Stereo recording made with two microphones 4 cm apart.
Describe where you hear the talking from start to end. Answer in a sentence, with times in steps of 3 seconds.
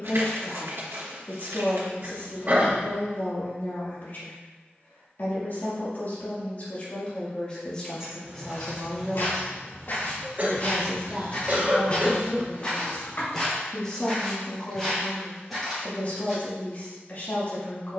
In this clip you hear the talking on the left from 0 s, in the centre from 9 s and on the left from 15 s.